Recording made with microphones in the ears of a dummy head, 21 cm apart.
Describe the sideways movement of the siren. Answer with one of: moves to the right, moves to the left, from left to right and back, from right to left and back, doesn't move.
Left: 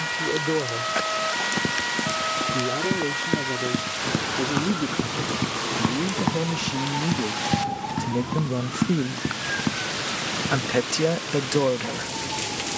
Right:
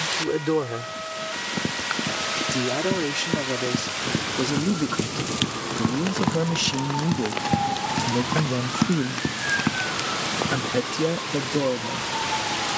moves to the right.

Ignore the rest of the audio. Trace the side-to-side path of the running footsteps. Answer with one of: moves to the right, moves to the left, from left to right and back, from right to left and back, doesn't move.
moves to the right.